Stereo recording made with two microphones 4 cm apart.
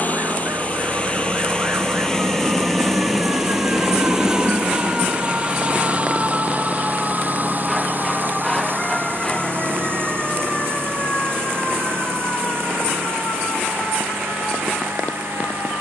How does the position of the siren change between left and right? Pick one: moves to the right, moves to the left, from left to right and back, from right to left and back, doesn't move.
moves to the left.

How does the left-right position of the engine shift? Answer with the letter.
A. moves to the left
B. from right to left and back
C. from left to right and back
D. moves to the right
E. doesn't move
D.